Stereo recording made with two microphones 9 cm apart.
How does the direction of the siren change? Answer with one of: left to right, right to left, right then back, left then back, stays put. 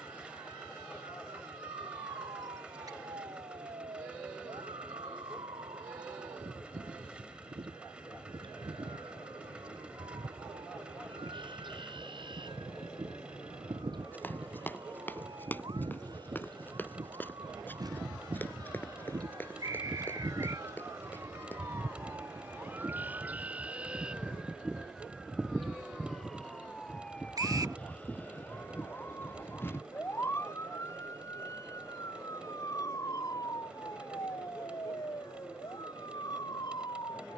right to left.